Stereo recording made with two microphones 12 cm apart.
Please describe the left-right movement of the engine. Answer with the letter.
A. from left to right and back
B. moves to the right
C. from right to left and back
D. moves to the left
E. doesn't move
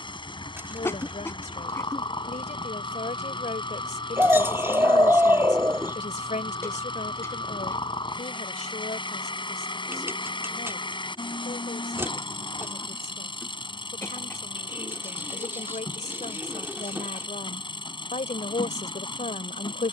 E.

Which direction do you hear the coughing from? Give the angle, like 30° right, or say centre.
20° left.